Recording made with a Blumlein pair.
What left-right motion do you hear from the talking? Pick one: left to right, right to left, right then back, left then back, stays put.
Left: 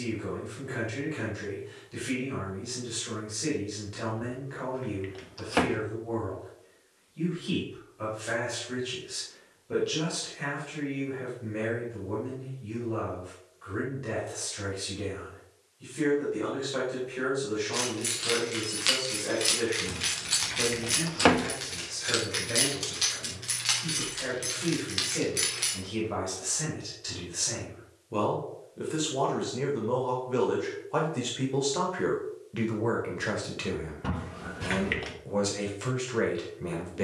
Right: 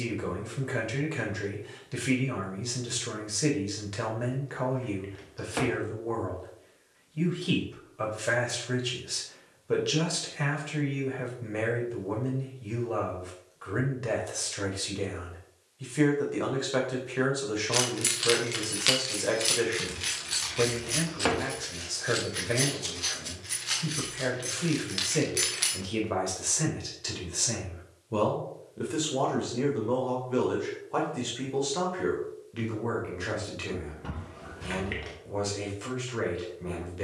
right to left.